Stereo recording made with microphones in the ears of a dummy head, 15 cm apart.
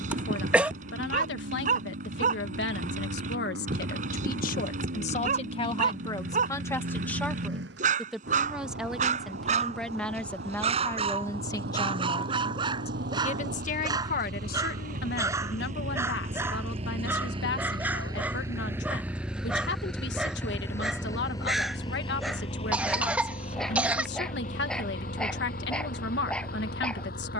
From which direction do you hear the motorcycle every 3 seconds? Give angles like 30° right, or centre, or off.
80° right, 80° right, 80° right, 70° right, 60° right, 40° right, centre, 30° left, 50° left.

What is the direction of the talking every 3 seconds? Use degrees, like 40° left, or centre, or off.
80° left, 50° left, 10° left, 10° left, 50° left, 70° left, 70° left, 70° left, 70° left.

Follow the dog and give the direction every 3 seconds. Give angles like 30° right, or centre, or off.
50° right, 50° right, 50° right, 40° right, 30° right, 10° right, 10° right, centre, centre.